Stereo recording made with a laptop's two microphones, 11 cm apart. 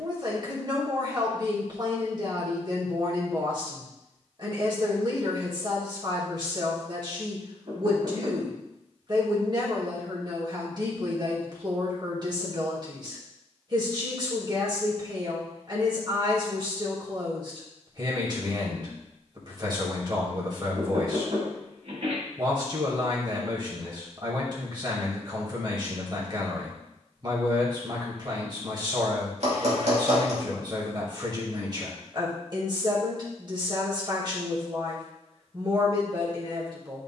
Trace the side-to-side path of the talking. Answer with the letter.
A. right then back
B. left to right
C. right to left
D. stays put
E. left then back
D.